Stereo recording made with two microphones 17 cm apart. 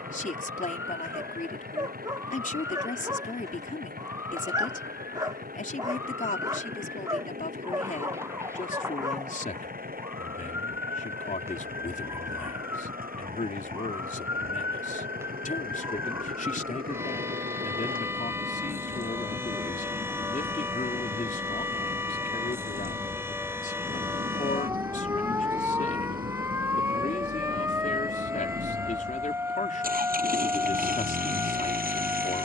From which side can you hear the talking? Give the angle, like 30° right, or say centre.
50° left.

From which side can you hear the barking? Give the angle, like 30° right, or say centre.
20° right.